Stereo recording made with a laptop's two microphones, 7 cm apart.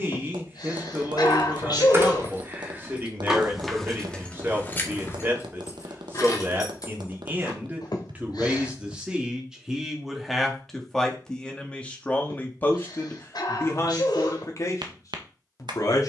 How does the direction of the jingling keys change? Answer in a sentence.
In this clip you hear the jingling keys travel towards the left.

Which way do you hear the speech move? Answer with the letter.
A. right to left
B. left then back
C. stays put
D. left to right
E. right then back
A.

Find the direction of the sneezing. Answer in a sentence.
You can hear the sneezing on the left.